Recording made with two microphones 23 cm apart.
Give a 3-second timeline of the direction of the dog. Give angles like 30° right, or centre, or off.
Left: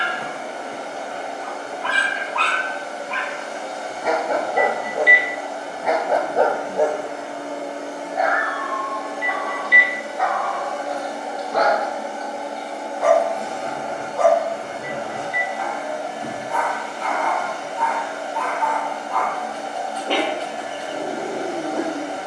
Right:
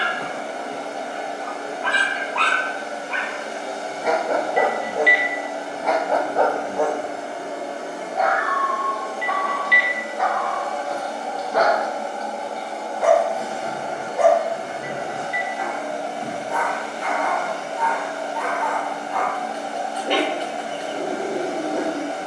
20° right, 10° right, 20° left, centre, 10° right, 20° right, 20° right, 20° right.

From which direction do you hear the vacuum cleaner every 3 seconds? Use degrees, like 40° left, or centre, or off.
30° right, 30° right, 20° right, 10° left, 10° right, 20° right, 20° right, 20° right.